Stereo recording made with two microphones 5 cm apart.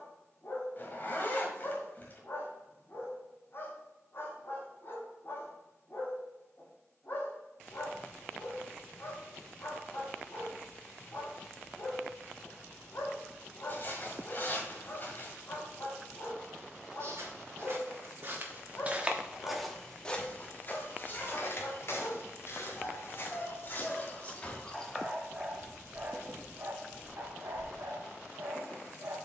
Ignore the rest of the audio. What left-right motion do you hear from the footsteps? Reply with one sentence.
You can hear the footsteps move from right to left and back again.